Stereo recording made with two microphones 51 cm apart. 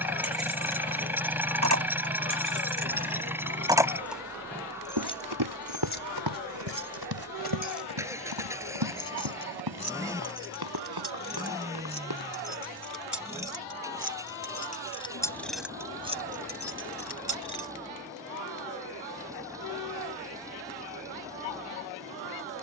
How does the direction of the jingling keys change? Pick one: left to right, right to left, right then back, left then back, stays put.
left then back.